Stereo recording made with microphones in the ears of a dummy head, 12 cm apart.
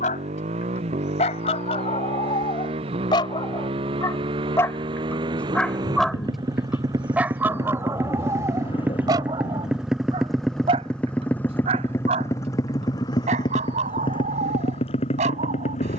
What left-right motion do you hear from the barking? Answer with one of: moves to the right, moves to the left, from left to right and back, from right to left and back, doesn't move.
moves to the right.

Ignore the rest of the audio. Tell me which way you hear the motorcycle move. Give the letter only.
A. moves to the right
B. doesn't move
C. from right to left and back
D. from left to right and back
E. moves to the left
E.